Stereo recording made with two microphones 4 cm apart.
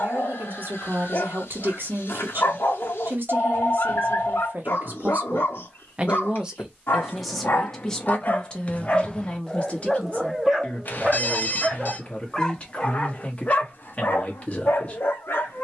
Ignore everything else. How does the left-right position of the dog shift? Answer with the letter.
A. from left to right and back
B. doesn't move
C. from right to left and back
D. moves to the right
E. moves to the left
A.